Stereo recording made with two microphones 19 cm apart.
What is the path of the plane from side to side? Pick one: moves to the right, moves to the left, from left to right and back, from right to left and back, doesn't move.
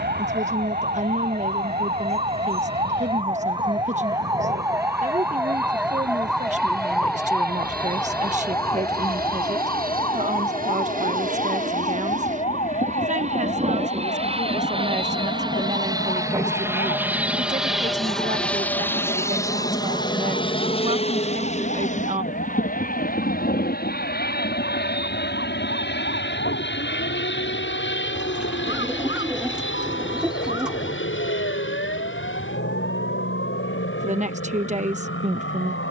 moves to the left.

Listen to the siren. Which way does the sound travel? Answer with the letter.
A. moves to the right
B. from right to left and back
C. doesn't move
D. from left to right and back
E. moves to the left
E.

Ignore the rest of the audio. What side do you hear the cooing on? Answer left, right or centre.
centre.